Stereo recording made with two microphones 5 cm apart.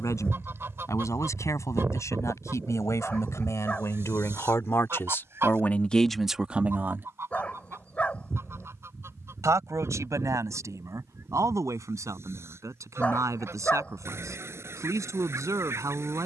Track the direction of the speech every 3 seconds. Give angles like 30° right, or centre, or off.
80° left, 60° left, 20° right, 80° right, 80° right, 80° right.